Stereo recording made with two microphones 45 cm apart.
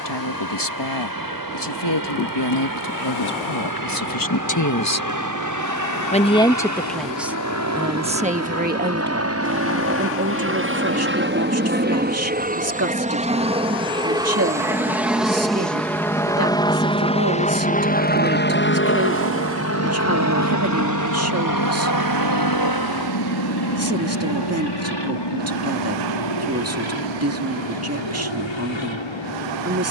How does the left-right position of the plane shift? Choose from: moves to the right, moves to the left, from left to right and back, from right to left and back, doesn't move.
moves to the left.